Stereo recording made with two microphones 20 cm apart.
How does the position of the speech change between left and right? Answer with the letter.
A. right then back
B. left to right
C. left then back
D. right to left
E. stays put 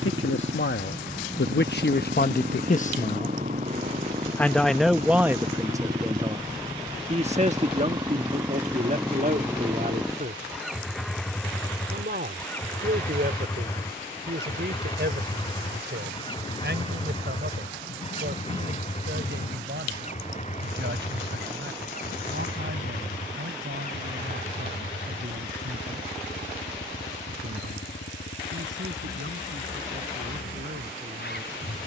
B.